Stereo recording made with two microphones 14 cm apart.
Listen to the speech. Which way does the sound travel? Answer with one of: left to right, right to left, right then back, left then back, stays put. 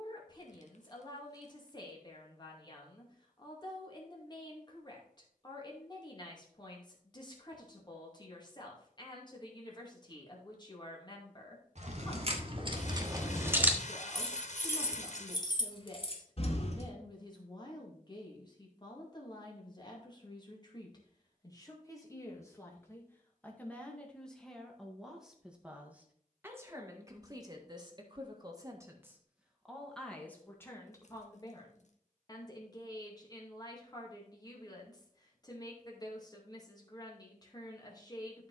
right then back.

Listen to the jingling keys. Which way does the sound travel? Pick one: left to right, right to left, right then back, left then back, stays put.
right to left.